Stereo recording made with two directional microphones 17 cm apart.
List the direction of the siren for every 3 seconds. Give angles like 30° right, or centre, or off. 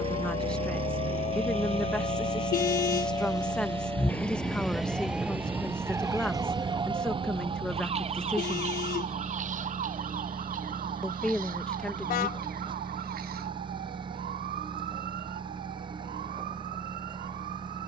40° left, centre, 30° right, 50° right, 60° right, 70° right.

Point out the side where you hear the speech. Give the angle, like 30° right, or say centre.
10° left.